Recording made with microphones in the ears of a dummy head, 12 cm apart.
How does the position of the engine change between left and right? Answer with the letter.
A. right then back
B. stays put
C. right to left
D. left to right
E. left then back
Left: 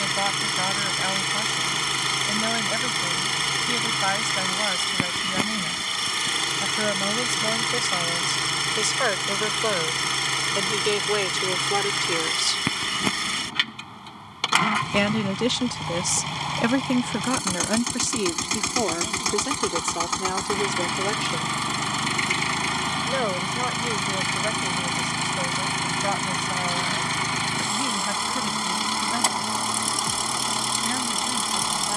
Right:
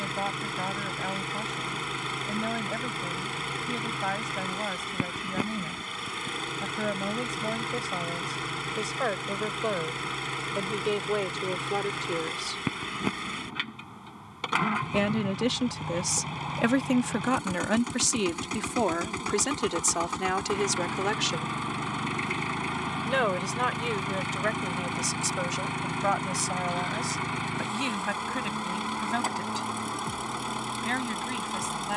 B.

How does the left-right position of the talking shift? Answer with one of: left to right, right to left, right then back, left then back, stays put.
left to right.